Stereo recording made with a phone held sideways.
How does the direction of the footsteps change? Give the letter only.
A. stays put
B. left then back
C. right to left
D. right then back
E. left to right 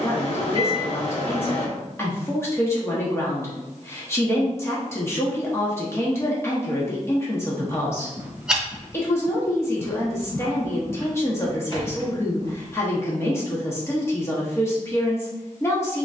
C.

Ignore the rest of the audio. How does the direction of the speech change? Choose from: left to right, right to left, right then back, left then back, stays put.
stays put.